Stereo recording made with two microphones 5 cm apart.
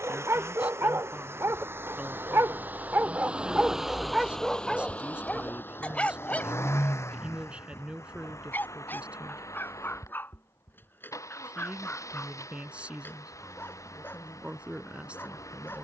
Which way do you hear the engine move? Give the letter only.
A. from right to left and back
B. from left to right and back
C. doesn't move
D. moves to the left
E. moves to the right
D.